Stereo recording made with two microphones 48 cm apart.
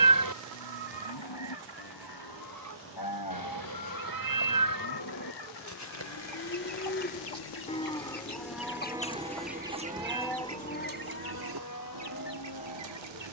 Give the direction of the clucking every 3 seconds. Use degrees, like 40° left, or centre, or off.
50° right, 40° left, 50° left, 30° right, 60° right.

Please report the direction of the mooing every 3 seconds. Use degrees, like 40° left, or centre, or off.
50° left, 40° left, 10° left, 10° left, 50° left.